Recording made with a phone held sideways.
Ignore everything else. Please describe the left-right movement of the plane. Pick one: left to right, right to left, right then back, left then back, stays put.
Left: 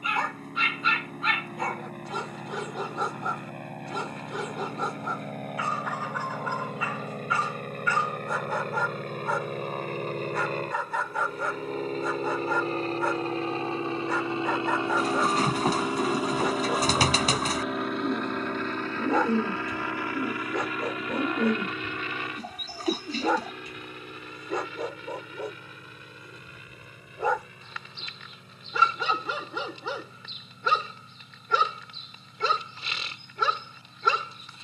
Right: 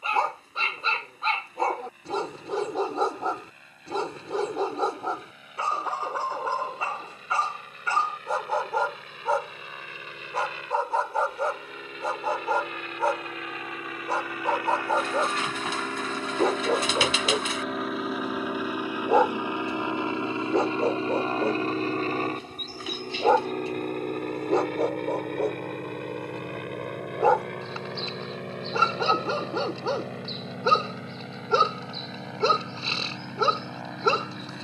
left to right.